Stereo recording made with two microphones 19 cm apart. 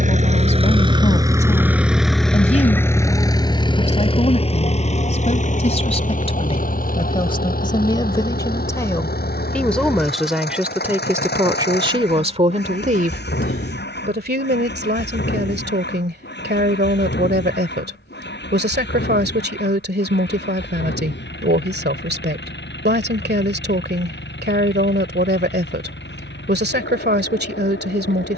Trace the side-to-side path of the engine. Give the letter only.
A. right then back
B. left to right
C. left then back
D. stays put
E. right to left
E.